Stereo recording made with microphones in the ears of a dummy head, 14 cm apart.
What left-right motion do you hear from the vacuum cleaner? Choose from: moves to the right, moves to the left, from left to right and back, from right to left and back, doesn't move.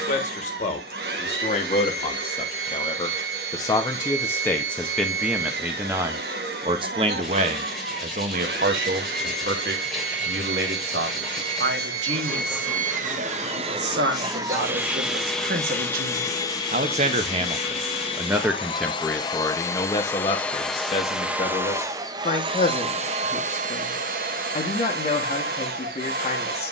from right to left and back.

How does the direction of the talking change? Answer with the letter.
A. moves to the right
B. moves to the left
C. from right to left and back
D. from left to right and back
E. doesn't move
D.